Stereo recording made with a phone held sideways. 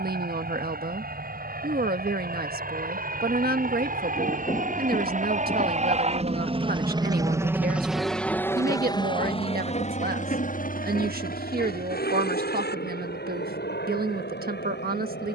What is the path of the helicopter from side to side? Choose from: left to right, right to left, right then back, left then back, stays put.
right to left.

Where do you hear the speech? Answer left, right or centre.
right.